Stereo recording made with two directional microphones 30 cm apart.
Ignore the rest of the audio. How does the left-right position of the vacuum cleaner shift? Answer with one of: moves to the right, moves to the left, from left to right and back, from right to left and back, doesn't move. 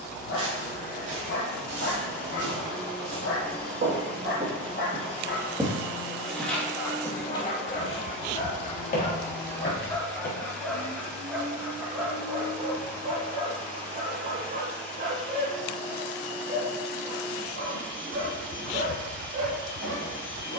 doesn't move.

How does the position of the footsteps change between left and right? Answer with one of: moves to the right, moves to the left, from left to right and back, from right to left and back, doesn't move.
moves to the left.